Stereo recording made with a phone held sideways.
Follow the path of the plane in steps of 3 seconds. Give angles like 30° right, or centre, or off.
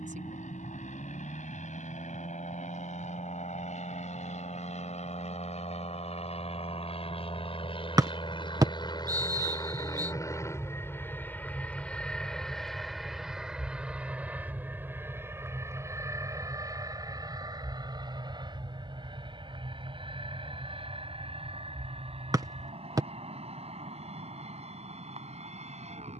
70° left, 60° left, 40° left, 20° left, centre, 20° right, 30° right, 40° right, 50° right.